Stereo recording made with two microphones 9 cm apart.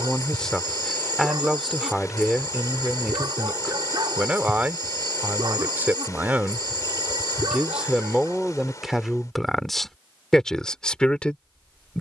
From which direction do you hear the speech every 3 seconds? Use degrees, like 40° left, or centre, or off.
centre, 20° right, 10° right, 10° left.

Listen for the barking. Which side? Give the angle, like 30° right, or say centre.
50° right.